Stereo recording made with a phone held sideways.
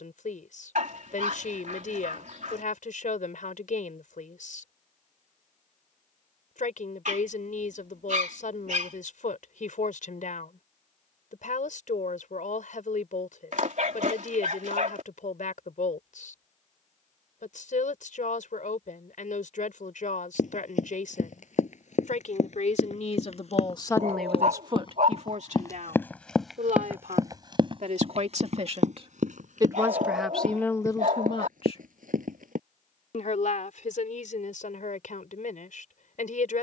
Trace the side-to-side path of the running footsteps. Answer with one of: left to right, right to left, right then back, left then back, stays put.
left to right.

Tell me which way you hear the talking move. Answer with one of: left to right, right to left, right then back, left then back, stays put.
right then back.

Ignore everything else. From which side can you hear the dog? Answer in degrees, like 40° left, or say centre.
70° right.